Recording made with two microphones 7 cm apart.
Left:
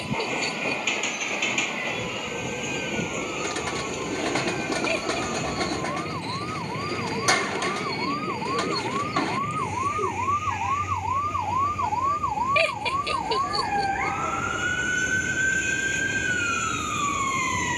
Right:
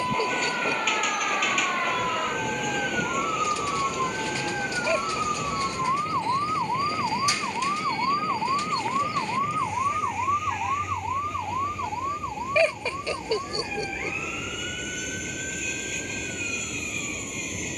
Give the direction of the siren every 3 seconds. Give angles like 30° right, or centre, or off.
50° right, 40° right, 30° right, centre, 40° left, 60° left.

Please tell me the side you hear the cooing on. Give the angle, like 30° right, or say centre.
60° left.